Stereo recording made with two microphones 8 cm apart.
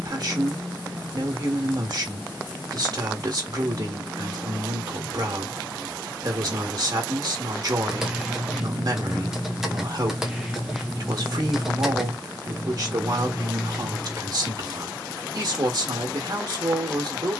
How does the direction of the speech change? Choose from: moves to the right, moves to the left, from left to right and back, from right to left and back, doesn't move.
doesn't move.